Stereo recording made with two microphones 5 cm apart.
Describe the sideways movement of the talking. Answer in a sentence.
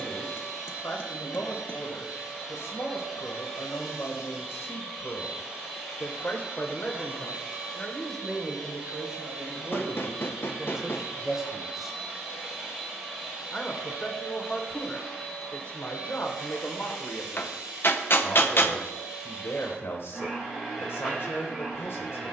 You can hear the talking move from left to right and back again.